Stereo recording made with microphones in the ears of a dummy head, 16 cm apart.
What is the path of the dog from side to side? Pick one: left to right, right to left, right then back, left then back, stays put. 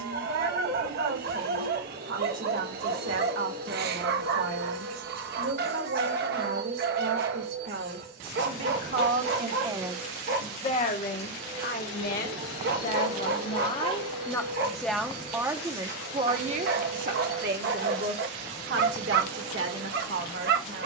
stays put.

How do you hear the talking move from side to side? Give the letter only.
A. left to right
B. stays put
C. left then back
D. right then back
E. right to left
C.